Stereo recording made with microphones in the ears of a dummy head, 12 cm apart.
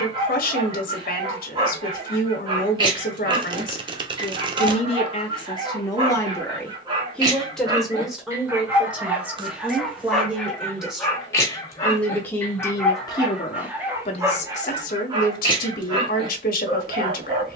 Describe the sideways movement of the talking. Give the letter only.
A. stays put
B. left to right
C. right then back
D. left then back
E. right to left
C.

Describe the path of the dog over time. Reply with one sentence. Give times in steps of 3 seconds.
You can hear the dog on the right from 0 s, in the centre from 9 s and on the right from 15 s.